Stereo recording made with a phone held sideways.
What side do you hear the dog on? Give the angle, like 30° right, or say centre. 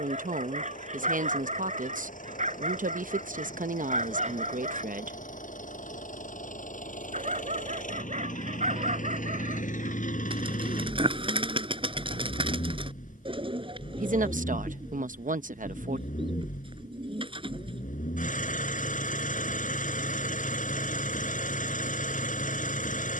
60° right.